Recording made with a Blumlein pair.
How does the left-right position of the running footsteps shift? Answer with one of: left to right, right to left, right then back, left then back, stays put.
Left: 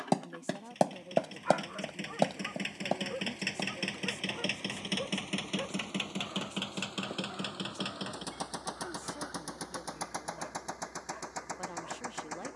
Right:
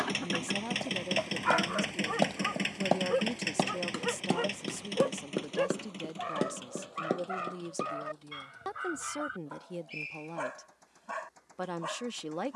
left to right.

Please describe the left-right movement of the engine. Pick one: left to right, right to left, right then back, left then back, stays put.
right to left.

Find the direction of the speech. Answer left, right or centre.
right.